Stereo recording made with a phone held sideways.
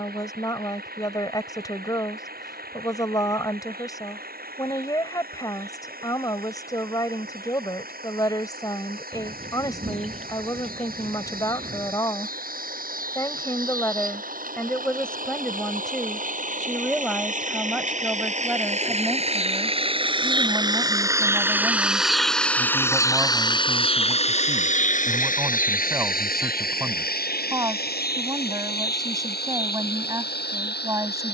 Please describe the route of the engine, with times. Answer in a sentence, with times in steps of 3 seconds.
You can hear the engine on the right from 0 s, in the centre from 21 s and on the left from 24 s.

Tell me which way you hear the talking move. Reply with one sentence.
You can hear the talking move from left to right.